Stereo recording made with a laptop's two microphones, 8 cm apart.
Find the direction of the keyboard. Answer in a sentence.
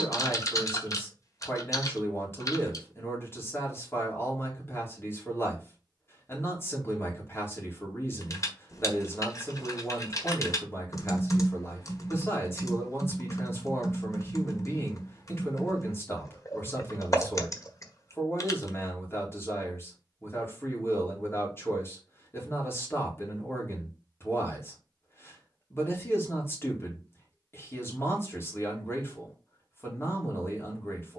In this clip you hear the keyboard on the left.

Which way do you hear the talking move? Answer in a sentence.
You can hear the talking stay in one place.